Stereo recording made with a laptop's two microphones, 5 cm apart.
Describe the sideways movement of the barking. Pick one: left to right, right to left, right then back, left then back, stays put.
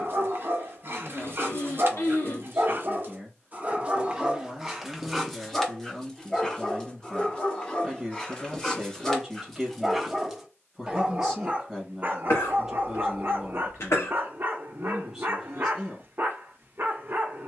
left then back.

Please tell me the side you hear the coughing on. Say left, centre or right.
left.